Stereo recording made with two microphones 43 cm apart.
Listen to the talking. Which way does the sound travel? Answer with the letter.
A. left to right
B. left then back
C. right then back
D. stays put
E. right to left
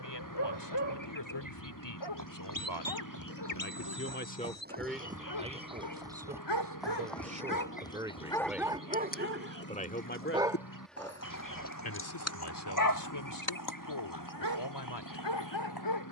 C.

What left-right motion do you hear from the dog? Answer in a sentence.
You can hear the dog move from left to right and back again.